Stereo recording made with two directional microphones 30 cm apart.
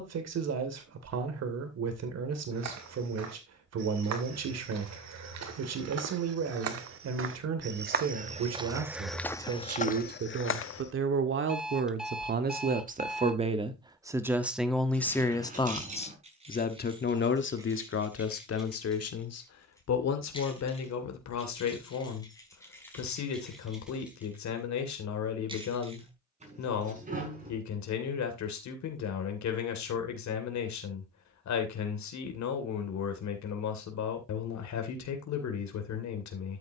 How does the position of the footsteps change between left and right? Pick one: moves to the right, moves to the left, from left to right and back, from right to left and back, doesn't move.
moves to the left.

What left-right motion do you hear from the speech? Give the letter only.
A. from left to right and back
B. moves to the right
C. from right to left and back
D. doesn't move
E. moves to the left
E.